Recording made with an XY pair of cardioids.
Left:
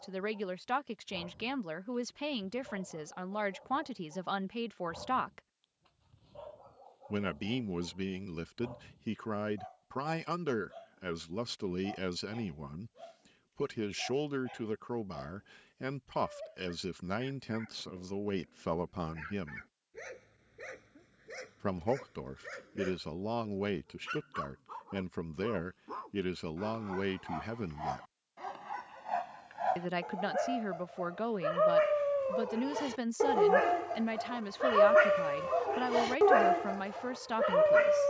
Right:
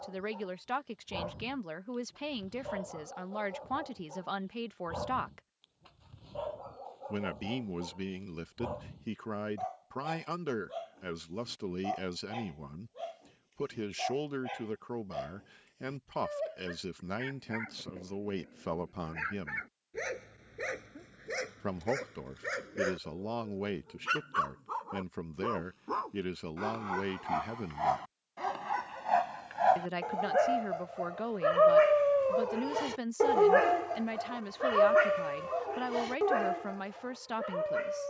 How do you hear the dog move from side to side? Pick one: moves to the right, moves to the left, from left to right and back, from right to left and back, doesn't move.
moves to the left.